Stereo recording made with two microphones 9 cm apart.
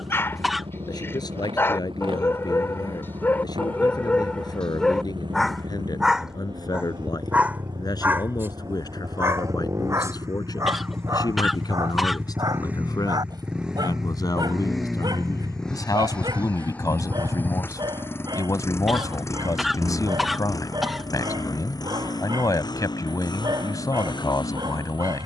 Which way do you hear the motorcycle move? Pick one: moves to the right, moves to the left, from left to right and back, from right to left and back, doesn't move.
moves to the left.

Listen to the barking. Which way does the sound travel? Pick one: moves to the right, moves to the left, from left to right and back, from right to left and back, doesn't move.
moves to the right.